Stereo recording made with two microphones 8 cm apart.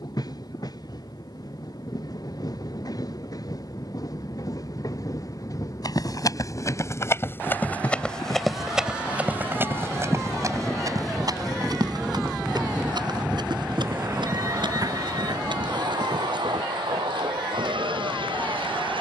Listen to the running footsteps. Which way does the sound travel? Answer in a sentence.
You can hear the running footsteps move to the right.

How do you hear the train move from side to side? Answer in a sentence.
You can hear the train move from left to right.